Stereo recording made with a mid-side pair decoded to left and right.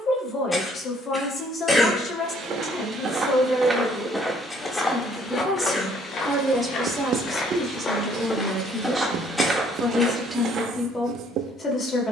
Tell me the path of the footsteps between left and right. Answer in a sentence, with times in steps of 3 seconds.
In this clip you hear the footsteps on the right from 0 s, in the centre from 3 s, on the left from 6 s and on the right from 9 s.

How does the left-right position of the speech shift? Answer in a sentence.
In this clip you hear the speech move from left to right and back again.